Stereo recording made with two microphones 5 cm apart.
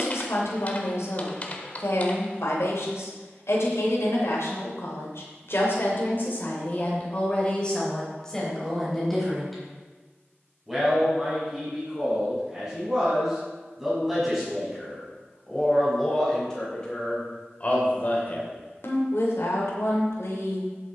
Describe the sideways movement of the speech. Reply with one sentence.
You can hear the speech go right and come back.